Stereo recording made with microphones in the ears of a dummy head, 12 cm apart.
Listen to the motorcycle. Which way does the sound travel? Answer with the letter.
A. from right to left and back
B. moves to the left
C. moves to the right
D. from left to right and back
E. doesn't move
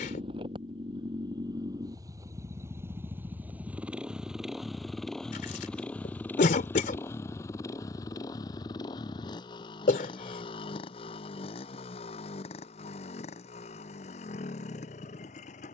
B.